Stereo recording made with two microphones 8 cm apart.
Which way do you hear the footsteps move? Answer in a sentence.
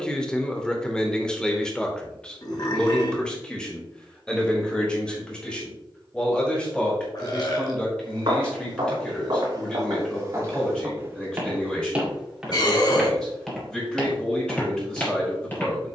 You can hear the footsteps go from the right side to the left.